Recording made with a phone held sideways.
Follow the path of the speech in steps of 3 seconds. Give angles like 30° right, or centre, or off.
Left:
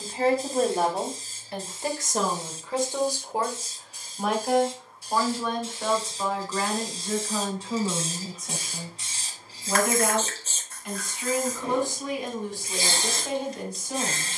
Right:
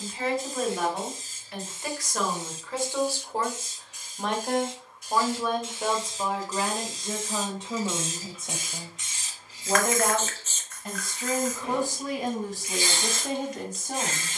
30° left, centre, 20° right, 40° right, 50° right.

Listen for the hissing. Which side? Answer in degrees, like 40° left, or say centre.
30° left.